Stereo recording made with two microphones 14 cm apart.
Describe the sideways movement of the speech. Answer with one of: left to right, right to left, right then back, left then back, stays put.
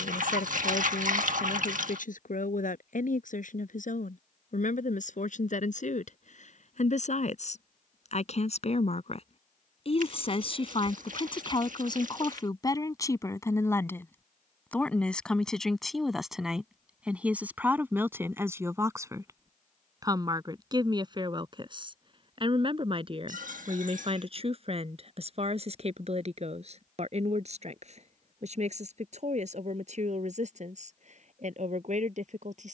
left to right.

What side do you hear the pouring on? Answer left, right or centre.
right.